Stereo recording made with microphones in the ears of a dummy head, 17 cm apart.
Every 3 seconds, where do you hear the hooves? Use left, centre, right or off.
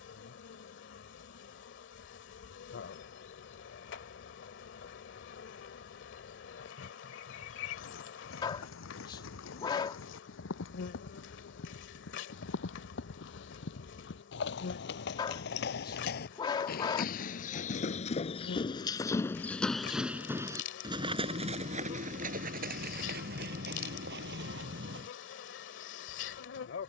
off, off, left, left, left, left, centre, right, right.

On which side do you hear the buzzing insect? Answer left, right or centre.
left.